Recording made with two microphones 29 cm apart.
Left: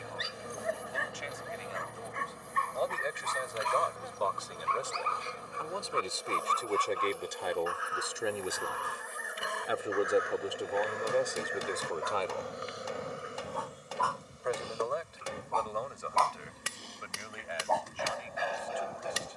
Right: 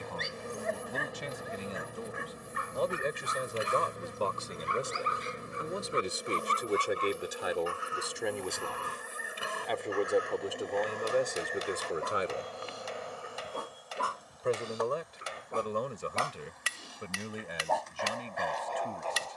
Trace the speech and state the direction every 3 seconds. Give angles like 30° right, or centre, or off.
50° right, 30° right, 10° right, centre, 30° right, 50° right, 50° right.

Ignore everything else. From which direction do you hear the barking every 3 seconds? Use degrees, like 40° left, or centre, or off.
centre, 20° right, 30° right, 40° right, 30° right, 10° right, 10° left.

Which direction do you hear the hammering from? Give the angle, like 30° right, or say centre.
60° left.